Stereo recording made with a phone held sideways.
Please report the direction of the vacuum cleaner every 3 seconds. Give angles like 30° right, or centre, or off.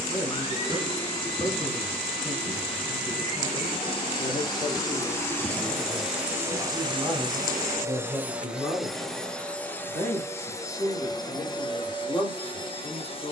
40° left, 20° left, 20° right, 20° left, 30° left.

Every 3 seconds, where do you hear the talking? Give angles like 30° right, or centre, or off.
40° left, 30° left, centre, 20° left, 30° left.